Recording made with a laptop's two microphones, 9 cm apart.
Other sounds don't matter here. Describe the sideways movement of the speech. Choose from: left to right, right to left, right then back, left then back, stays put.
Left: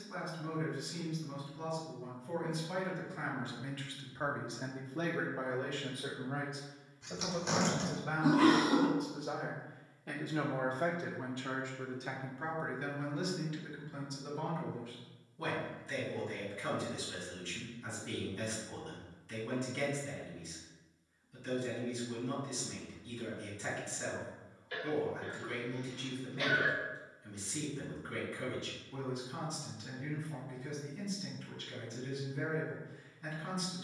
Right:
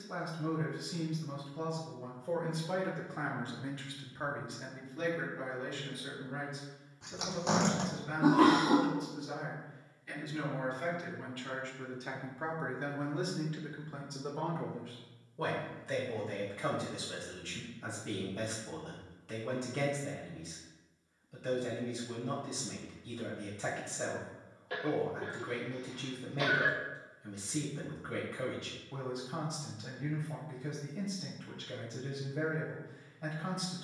left then back.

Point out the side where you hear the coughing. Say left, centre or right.
right.